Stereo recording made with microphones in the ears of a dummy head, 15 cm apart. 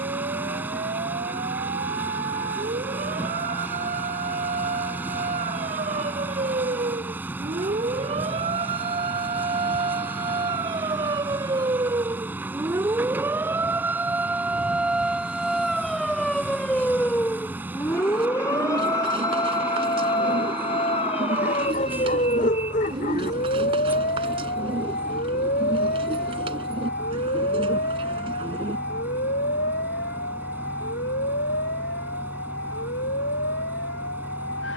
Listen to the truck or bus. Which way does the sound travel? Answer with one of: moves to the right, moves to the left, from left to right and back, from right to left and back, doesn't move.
doesn't move.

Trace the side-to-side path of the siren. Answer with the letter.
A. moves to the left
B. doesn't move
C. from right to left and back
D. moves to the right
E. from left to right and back
A.